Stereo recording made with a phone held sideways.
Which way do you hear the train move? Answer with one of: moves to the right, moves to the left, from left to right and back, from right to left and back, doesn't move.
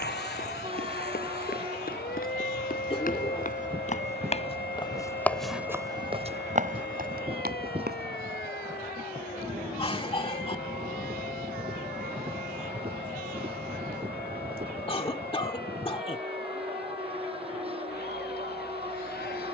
doesn't move.